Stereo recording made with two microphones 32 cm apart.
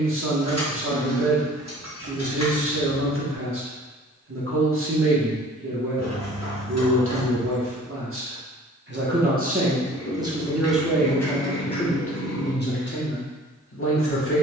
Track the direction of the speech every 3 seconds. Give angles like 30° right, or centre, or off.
40° right, 40° right, 40° right, 10° right, 40° left.